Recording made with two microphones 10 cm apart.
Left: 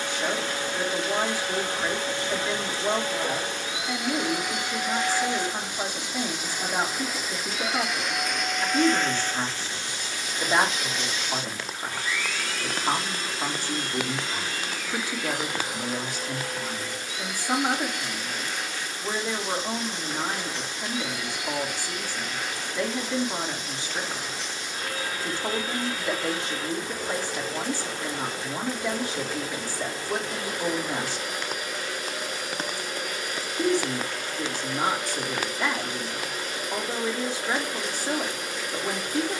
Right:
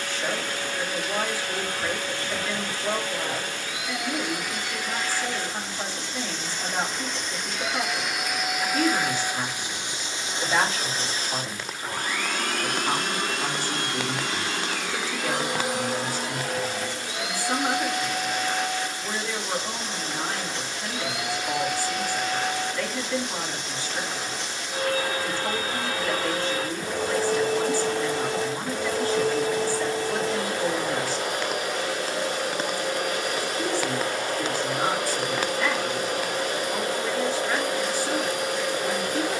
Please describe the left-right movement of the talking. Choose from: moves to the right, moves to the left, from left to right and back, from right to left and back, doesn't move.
doesn't move.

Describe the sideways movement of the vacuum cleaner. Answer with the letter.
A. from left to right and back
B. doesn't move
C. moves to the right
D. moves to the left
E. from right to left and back
C.